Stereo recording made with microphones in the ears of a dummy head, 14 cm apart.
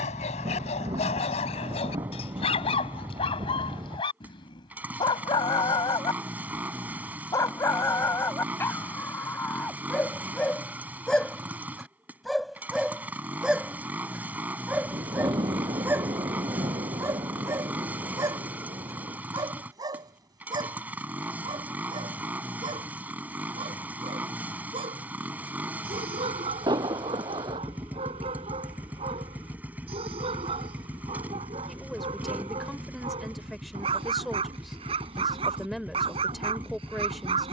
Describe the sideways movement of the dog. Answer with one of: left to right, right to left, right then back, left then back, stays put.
left to right.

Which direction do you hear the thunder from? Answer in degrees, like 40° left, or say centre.
30° right.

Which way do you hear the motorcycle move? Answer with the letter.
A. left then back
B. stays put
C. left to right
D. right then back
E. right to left
B.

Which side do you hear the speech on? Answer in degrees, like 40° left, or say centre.
centre.